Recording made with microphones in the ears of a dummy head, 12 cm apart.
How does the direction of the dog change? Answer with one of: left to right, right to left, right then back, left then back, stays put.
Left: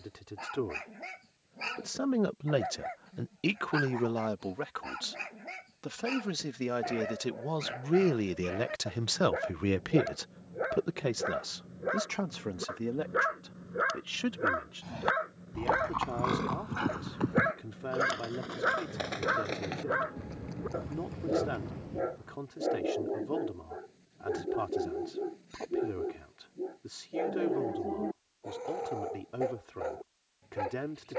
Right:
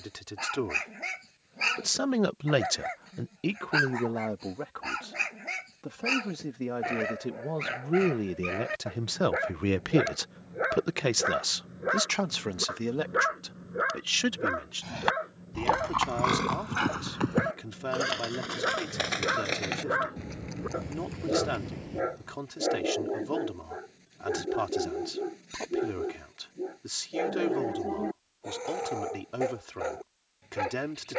left then back.